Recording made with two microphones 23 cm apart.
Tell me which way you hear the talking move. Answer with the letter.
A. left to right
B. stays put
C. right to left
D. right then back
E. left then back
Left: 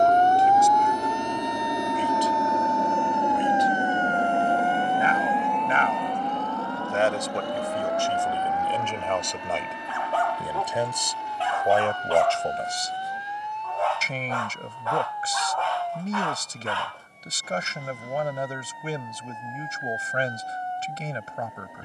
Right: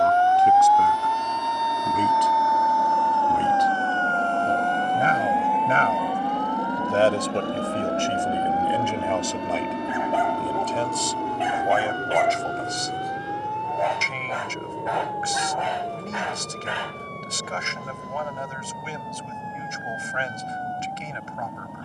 C.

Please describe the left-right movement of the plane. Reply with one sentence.
In this clip you hear the plane move from left to right.